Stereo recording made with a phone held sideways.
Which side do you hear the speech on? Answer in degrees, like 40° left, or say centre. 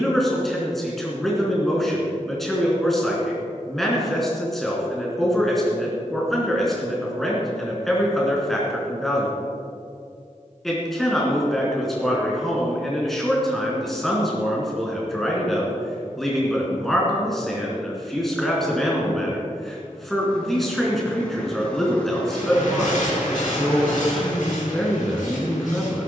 centre.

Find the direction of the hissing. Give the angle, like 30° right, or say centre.
80° left.